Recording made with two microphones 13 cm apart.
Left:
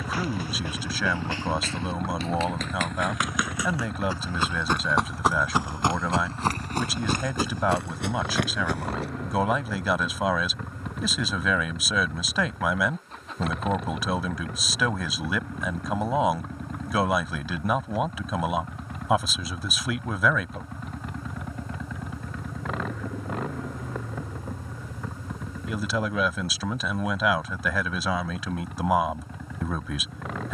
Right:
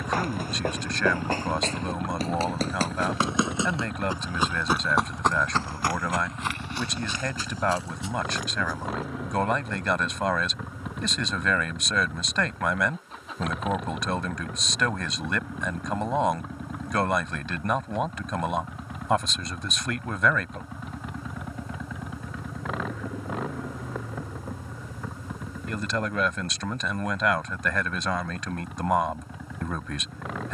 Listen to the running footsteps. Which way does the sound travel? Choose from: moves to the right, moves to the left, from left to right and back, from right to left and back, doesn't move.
moves to the left.